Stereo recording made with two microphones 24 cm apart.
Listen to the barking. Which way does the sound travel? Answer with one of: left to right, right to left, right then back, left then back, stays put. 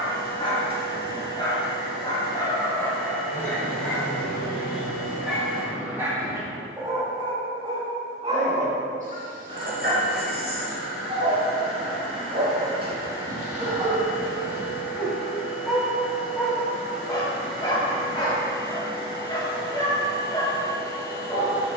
right then back.